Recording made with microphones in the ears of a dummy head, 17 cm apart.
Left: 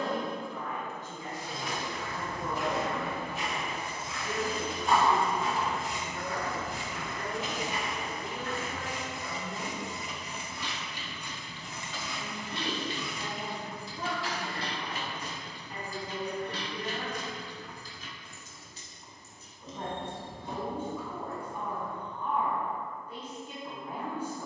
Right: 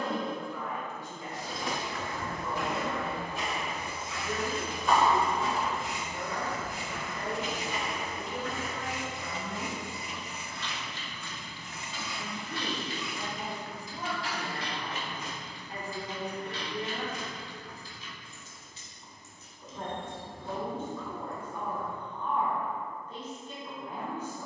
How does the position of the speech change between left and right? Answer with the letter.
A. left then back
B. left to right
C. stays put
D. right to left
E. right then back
E.